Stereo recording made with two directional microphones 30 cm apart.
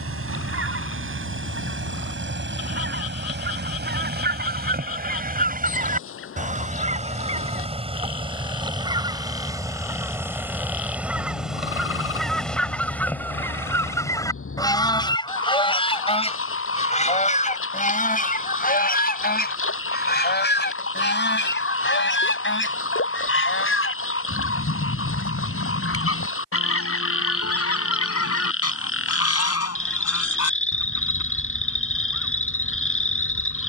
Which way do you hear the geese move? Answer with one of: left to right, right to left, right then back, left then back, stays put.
right to left.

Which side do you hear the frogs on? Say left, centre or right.
left.